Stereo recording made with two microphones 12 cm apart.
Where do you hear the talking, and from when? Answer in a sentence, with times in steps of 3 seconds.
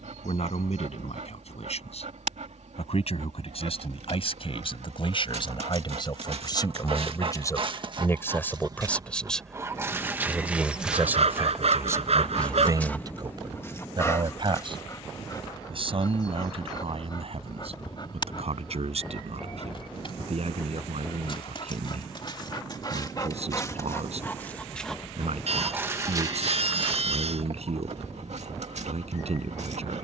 In this clip you hear the talking on the left from 0 s, in the centre from 9 s and on the right from 12 s.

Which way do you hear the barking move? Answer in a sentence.
You can hear the barking go left and come back.